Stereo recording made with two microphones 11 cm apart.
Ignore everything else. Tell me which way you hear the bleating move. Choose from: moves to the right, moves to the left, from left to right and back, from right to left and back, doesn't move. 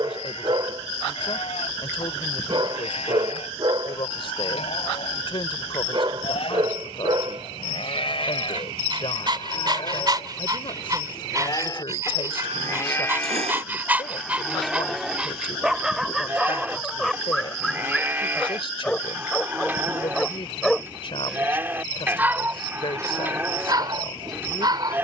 moves to the right.